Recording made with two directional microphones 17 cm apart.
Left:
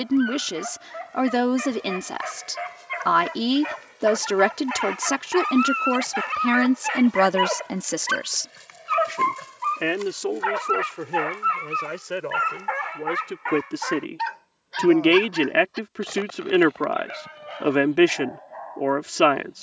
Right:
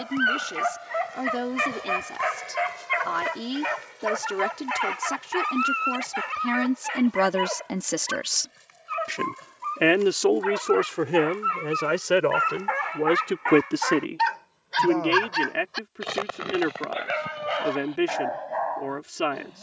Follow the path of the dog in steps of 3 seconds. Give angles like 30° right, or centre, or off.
40° right, 10° right, 30° left, 30° left, 10° right, 50° right, 60° right.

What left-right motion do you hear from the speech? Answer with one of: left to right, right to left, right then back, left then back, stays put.
right then back.